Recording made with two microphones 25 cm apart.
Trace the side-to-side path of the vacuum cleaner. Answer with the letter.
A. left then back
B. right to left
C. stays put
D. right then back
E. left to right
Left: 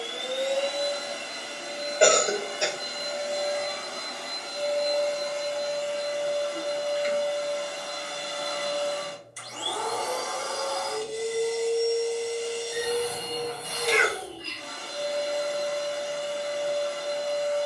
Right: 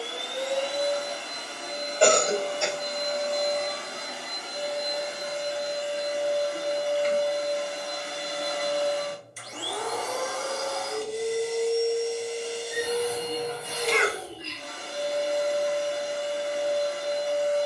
E.